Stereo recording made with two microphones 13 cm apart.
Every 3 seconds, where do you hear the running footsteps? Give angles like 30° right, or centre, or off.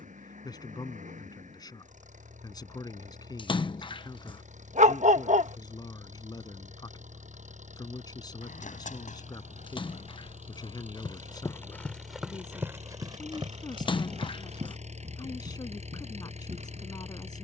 off, off, 70° left, 50° left, 30° right, 60° right.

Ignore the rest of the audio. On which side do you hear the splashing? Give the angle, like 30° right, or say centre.
40° left.